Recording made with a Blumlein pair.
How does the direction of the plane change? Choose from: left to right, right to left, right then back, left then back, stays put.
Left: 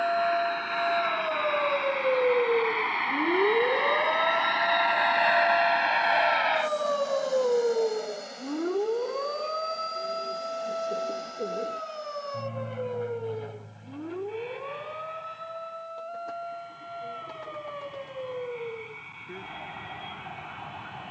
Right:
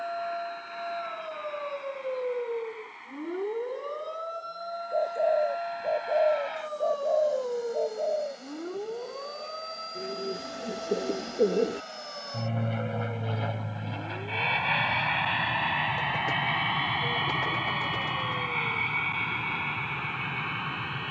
left to right.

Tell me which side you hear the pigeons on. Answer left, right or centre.
right.